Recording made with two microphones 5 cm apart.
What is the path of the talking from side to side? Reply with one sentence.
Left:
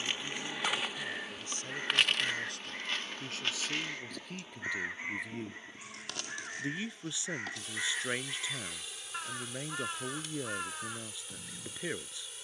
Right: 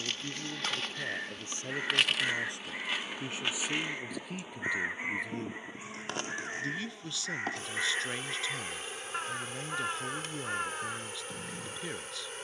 In this clip you hear the talking move to the left.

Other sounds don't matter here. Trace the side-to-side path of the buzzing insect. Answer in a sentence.
You can hear the buzzing insect travel towards the right.